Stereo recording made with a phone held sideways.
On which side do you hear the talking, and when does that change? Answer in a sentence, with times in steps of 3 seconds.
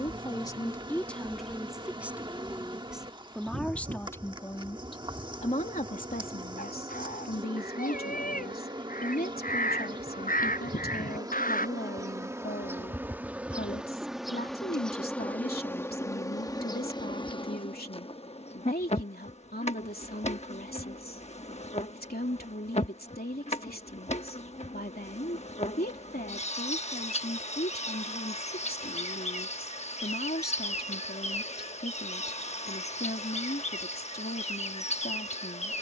In this clip you hear the talking in the centre from 0 s and on the left from 3 s.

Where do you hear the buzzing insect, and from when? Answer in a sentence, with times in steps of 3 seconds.
You can hear the buzzing insect on the right from 0 s, in the centre from 12 s and on the left from 15 s.